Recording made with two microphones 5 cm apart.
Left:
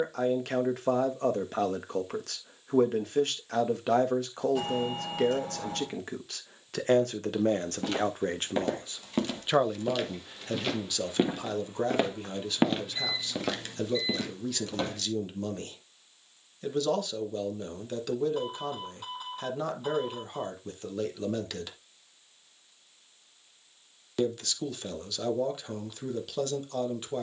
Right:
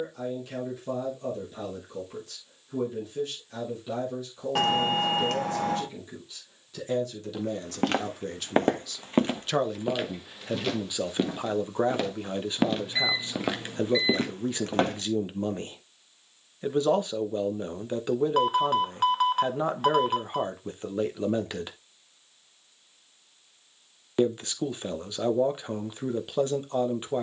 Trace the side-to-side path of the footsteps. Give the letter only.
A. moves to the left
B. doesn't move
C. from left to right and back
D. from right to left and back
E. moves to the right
D.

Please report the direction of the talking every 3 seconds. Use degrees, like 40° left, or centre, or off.
70° left, 70° left, 50° left, 10° right, 20° right, 20° right, 20° right, 20° right, 20° right.